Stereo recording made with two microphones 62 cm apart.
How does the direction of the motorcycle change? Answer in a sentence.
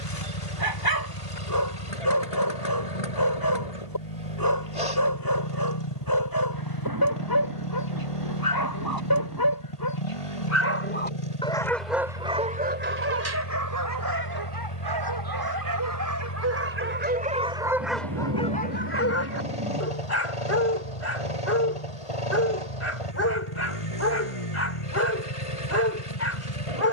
You can hear the motorcycle stay put.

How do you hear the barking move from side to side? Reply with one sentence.
In this clip you hear the barking go right and come back.